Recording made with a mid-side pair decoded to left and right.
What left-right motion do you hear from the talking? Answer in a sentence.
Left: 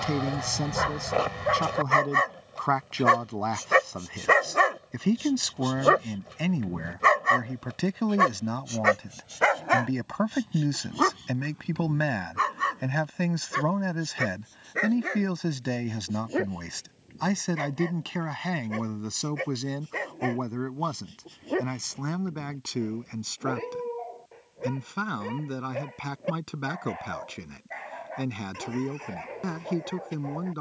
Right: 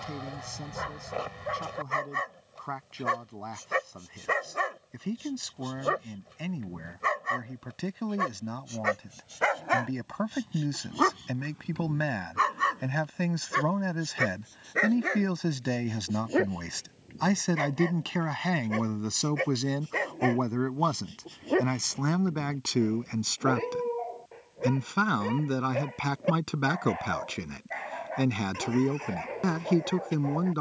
You can hear the talking move from left to right.